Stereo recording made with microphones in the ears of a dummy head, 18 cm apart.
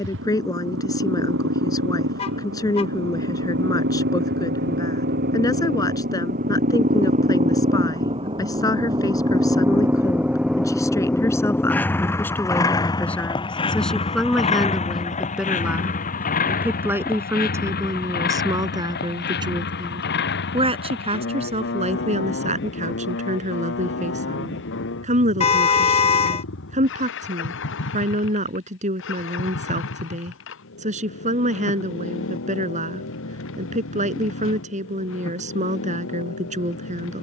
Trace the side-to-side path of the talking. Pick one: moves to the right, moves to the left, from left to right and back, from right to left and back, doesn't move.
moves to the right.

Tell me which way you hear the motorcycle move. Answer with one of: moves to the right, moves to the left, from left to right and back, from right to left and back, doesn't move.
moves to the left.